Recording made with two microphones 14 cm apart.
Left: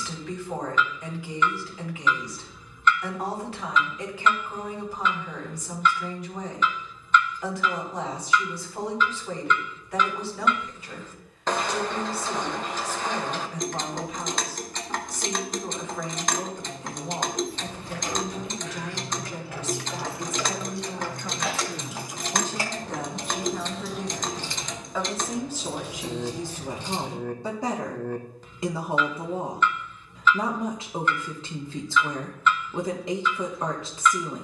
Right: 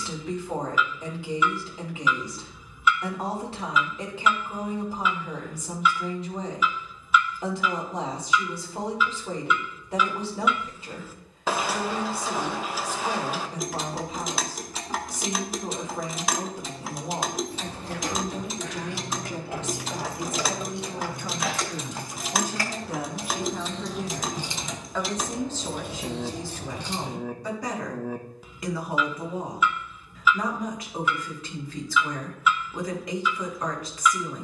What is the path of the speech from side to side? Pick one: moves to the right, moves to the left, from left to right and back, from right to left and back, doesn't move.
moves to the left.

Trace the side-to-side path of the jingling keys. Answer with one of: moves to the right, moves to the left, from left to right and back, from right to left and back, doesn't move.
from right to left and back.